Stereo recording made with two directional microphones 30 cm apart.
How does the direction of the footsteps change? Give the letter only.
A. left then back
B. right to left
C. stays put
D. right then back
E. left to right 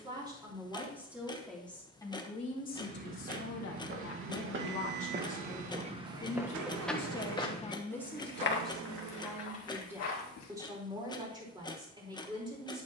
B.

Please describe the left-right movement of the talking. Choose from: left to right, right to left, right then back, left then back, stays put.
left then back.